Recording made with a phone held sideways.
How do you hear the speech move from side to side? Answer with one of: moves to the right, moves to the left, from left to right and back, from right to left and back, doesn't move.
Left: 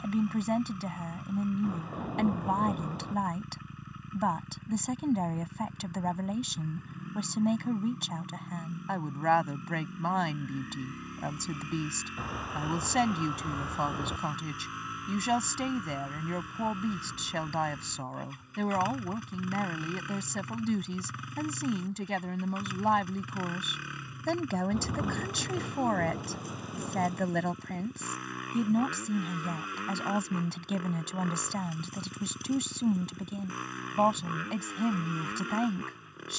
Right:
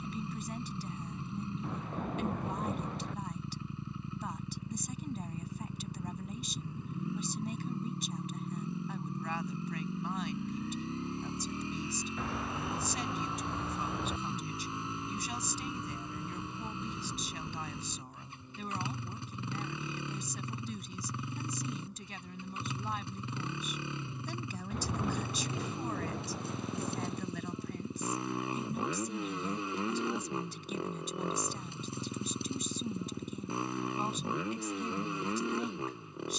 doesn't move.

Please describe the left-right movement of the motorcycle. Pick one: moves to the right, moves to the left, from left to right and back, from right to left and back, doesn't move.
doesn't move.